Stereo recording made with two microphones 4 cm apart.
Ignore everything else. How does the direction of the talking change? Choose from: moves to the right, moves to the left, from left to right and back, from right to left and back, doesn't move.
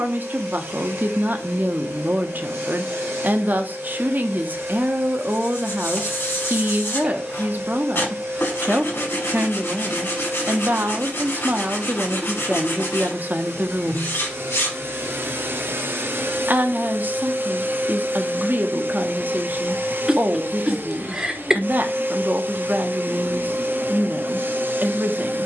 doesn't move.